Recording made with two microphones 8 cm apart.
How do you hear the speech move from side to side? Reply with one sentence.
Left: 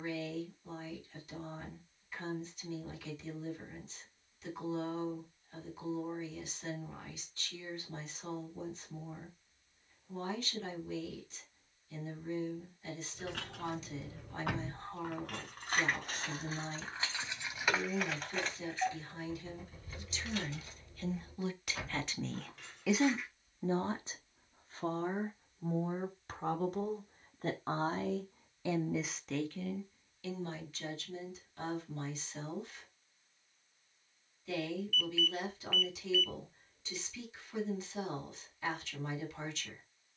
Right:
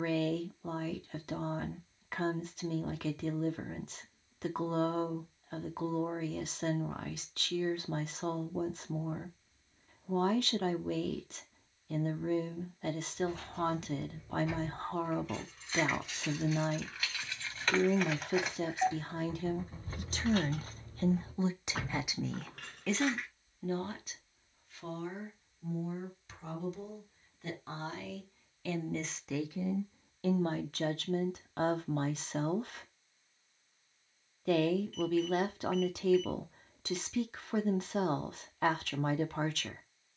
In this clip you hear the speech go left and come back.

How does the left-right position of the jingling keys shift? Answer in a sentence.
You can hear the jingling keys move from left to right.